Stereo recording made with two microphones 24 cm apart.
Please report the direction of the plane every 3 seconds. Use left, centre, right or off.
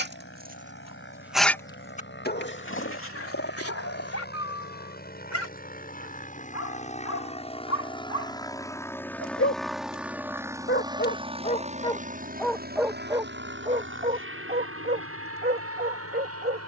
left, left, left, centre, right, right.